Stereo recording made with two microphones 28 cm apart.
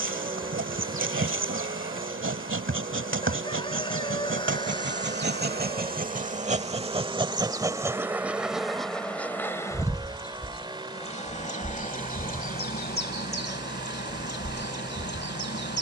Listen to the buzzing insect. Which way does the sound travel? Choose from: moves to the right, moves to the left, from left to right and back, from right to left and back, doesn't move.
moves to the left.